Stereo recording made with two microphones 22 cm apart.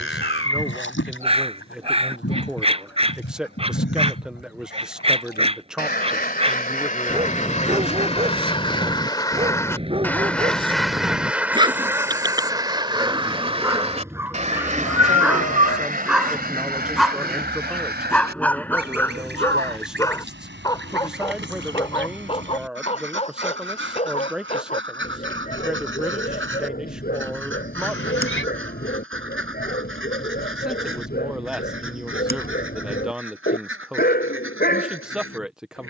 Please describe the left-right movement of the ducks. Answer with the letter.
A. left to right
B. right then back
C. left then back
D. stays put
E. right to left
A.